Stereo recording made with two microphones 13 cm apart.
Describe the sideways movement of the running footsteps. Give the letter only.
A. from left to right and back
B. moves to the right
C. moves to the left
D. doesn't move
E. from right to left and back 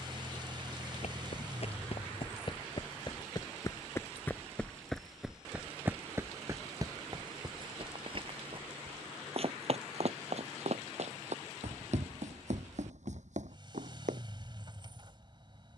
B.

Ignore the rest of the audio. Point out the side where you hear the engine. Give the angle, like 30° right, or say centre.
40° right.